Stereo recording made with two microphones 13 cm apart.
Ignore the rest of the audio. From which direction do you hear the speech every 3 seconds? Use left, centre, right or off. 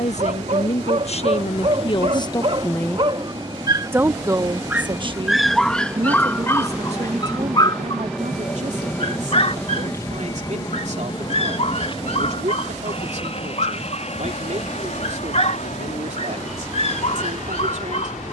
left, right, right, right, right, right.